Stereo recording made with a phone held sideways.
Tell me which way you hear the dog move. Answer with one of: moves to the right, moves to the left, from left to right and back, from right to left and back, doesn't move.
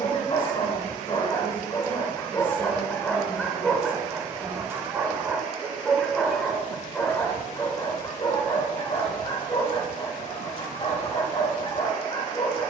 from left to right and back.